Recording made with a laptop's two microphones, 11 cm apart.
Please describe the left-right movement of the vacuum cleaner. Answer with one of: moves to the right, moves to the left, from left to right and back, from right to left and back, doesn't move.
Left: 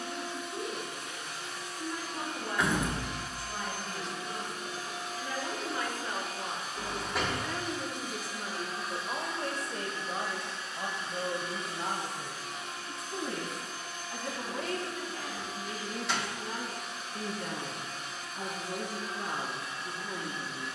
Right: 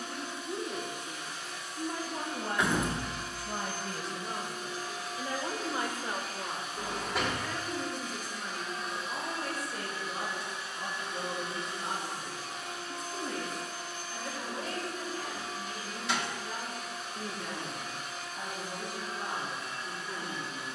moves to the right.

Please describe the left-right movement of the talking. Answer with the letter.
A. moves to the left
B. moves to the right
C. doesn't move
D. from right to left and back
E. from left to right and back
A.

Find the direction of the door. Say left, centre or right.
centre.